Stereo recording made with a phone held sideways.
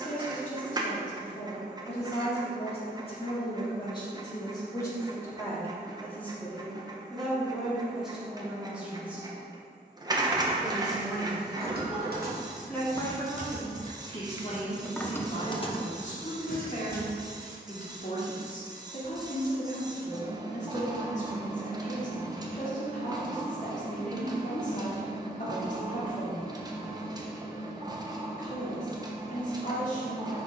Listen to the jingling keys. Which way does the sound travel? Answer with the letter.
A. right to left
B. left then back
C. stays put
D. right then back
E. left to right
A.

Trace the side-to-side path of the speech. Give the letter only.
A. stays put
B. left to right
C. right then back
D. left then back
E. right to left
C.